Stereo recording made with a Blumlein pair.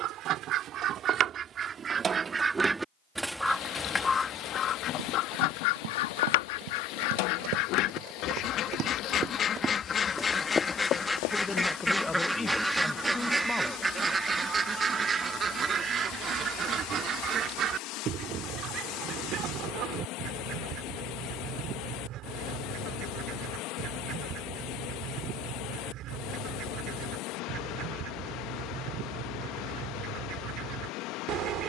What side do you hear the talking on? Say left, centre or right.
centre.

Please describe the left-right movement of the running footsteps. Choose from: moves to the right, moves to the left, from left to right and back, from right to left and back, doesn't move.
moves to the left.